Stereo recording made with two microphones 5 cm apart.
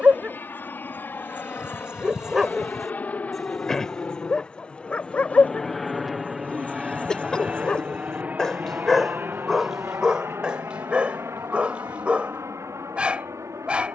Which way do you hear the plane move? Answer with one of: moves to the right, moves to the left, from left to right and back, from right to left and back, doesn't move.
moves to the right.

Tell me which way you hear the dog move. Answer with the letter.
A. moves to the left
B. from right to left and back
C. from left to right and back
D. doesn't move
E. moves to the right
B.